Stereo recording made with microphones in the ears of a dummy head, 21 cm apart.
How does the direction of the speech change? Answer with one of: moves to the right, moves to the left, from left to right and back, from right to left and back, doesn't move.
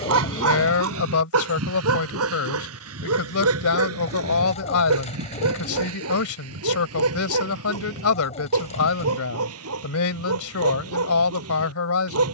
doesn't move.